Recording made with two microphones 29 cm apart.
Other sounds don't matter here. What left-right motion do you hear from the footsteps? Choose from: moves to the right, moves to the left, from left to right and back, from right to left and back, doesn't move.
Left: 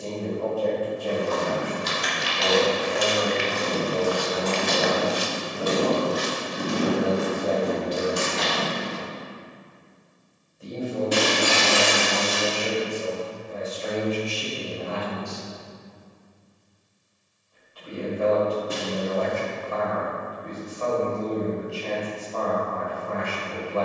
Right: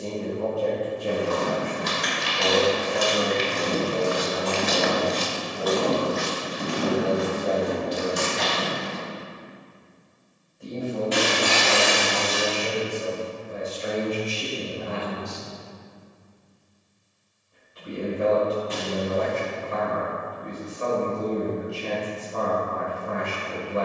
moves to the left.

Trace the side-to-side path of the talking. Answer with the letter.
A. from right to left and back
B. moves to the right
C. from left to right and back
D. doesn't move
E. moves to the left
A.